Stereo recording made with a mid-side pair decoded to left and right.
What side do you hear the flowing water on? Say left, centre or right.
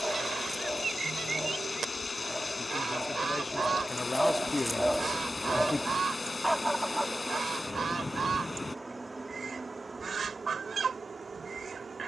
left.